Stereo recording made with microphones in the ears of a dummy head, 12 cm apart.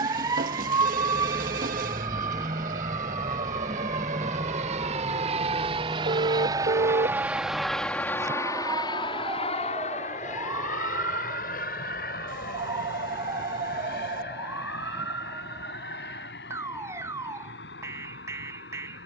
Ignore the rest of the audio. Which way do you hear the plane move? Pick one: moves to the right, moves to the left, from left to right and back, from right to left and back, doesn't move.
moves to the left.